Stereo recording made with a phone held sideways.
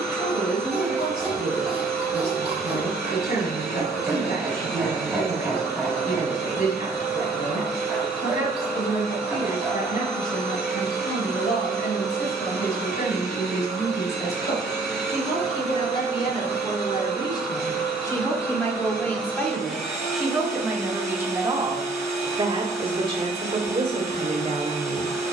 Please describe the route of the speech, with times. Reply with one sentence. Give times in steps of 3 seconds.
In this clip you hear the speech on the left from 0 s, in the centre from 18 s and on the right from 21 s.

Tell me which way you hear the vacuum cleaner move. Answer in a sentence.
You can hear the vacuum cleaner stay put.